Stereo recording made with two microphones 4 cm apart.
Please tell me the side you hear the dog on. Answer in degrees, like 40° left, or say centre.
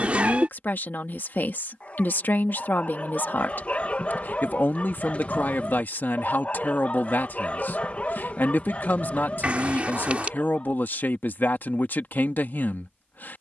40° left.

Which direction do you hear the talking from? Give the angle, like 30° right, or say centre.
60° left.